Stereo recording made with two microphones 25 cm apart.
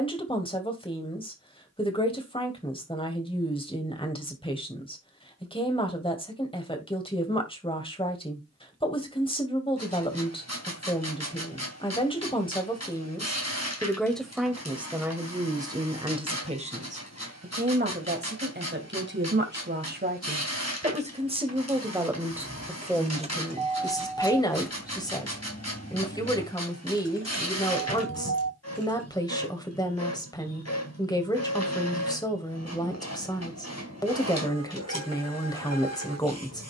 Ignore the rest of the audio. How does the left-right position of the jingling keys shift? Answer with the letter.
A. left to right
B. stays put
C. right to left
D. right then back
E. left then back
C.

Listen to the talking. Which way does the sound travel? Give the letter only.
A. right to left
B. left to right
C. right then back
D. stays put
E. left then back
C.